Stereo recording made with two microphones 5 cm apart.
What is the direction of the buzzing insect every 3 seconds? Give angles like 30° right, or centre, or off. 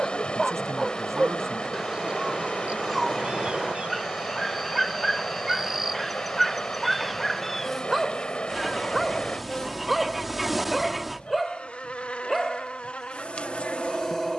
centre, 10° right, centre, 20° left, 20° left.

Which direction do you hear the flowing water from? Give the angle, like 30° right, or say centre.
20° left.